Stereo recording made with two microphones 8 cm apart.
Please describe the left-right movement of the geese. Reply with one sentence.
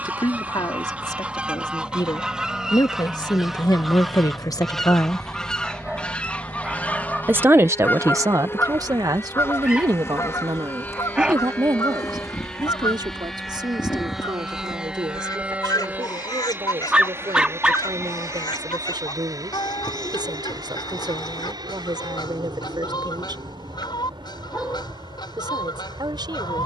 You can hear the geese travel towards the left.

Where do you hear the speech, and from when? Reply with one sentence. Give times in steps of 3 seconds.
In this clip you hear the speech on the left from 0 s and on the right from 6 s.